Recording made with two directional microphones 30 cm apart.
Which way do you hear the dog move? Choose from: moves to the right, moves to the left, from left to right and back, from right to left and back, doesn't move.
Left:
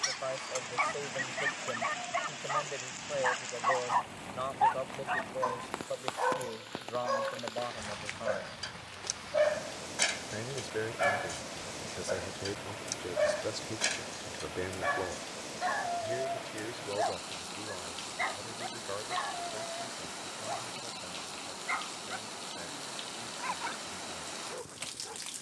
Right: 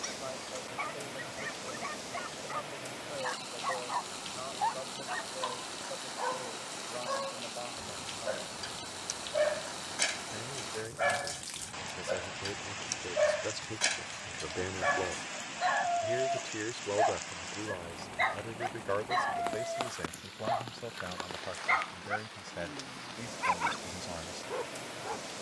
moves to the right.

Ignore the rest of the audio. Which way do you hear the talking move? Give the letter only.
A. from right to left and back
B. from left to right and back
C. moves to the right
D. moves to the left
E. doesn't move
C.